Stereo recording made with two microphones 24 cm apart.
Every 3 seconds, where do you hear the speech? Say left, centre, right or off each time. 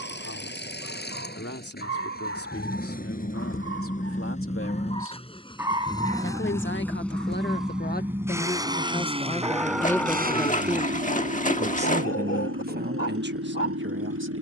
left, left, left, centre, right.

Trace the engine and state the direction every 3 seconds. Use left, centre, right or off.
left, left, centre, right, right.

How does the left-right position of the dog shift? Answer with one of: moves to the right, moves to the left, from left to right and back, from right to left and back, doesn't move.
from left to right and back.